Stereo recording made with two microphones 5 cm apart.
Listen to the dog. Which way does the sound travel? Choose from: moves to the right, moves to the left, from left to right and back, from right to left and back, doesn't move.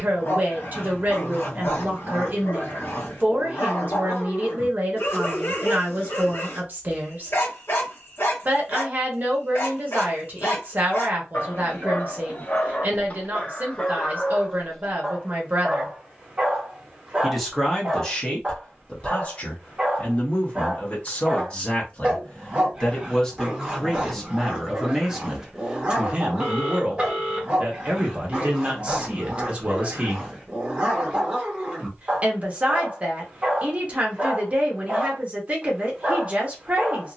moves to the right.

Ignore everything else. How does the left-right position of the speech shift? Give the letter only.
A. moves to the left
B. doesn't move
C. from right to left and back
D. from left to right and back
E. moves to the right
C.